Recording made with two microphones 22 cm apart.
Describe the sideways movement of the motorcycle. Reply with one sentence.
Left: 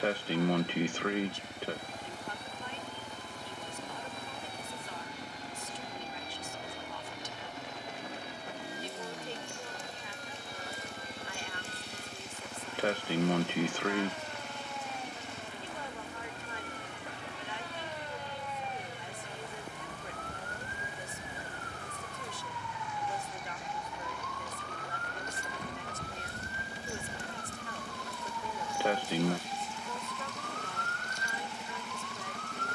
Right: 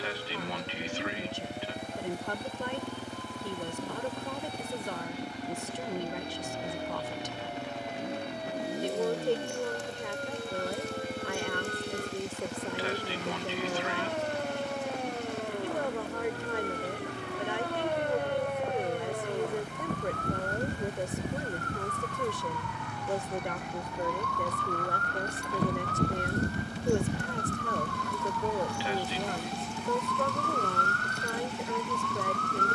You can hear the motorcycle stay put.